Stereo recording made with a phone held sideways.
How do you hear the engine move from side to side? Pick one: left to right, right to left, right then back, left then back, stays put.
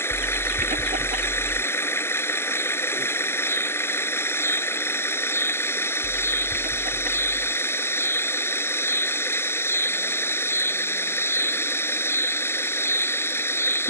stays put.